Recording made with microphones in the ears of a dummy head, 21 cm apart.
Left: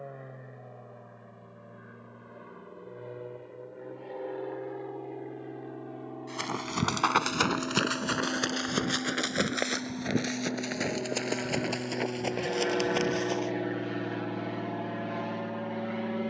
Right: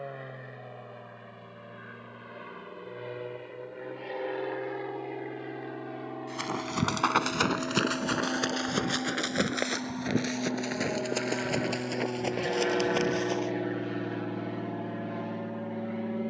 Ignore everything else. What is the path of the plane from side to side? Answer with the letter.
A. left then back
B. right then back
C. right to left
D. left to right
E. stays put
C.